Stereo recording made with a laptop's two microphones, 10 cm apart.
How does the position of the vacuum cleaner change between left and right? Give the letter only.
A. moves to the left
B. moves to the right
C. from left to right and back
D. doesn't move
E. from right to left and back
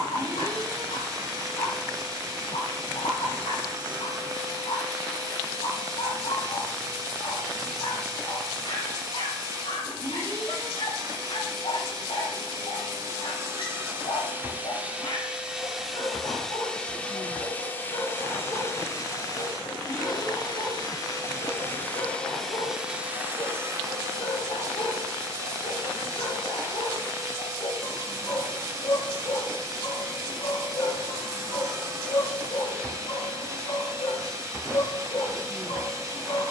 E.